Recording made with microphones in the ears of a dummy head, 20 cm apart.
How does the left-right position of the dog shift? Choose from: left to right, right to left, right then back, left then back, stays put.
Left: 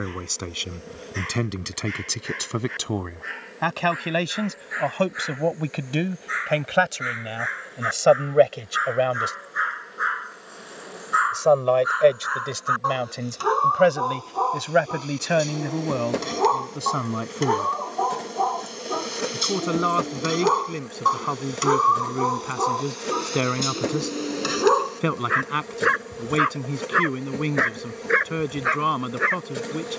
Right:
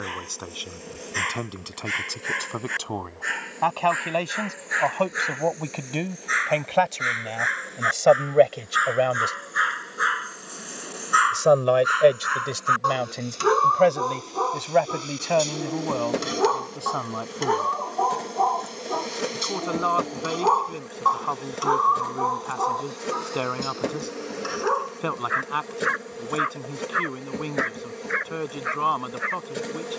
right to left.